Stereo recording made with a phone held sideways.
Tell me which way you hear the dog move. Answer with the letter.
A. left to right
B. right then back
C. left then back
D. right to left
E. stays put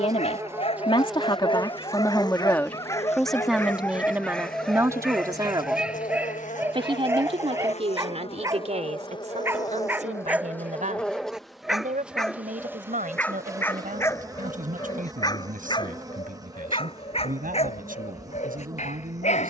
B.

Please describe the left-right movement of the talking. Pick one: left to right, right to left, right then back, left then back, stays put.
left to right.